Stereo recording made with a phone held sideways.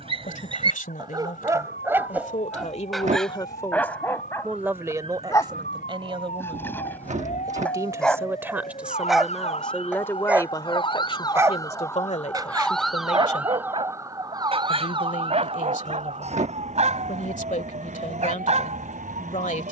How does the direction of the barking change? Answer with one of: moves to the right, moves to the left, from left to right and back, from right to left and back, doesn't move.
from right to left and back.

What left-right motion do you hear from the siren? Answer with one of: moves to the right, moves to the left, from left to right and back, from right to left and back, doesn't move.
moves to the right.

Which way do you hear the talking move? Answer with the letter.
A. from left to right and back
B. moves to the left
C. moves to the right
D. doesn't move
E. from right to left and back
A.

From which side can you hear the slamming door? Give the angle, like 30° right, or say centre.
60° right.